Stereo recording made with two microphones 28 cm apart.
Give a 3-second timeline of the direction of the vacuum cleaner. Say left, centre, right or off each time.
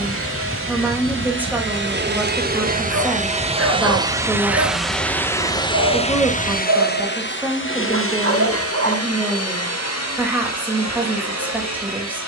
right, centre, left, left.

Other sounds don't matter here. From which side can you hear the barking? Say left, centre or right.
right.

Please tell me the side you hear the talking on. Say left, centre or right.
centre.